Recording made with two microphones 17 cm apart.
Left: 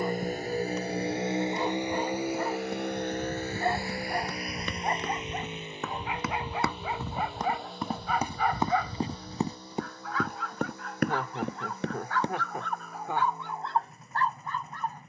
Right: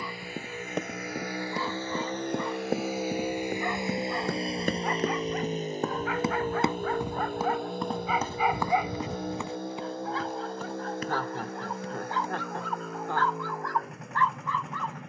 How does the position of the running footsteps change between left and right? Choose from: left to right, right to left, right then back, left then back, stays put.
right to left.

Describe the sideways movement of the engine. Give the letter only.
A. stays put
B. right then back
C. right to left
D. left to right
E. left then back
D.